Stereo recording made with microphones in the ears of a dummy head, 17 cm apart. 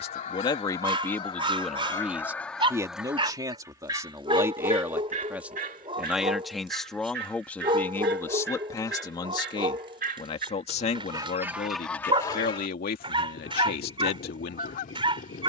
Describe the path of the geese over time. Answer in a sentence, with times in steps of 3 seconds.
You can hear the geese on the left from 0 s, on the right from 3 s and on the left from 12 s.